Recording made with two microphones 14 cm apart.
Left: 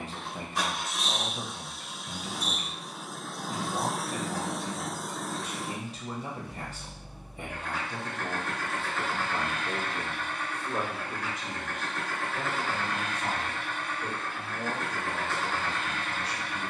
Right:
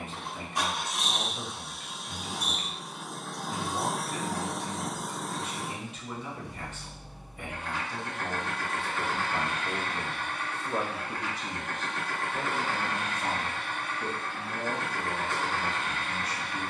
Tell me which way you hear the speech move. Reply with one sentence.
In this clip you hear the speech move to the right.